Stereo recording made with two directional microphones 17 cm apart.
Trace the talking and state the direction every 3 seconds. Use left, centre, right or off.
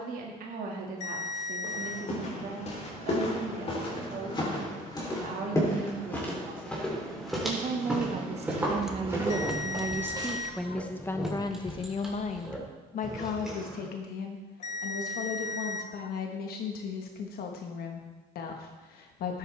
right, right, right, centre, left, left, left.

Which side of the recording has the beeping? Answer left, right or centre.
left.